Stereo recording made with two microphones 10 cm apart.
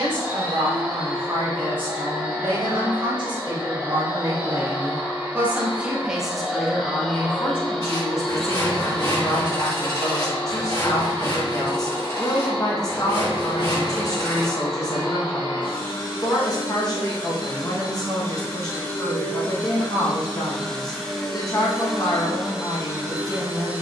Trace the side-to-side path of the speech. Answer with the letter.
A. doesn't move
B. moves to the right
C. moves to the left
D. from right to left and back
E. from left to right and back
C.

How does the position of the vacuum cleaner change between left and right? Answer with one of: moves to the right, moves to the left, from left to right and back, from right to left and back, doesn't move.
from right to left and back.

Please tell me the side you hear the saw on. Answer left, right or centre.
left.